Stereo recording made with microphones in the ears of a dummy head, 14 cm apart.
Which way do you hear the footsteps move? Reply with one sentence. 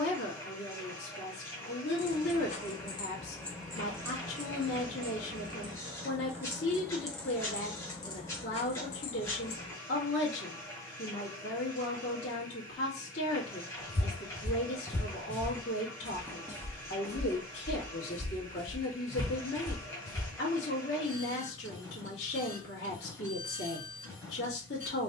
You can hear the footsteps move from left to right and back again.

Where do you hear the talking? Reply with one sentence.
You can hear the talking on the left.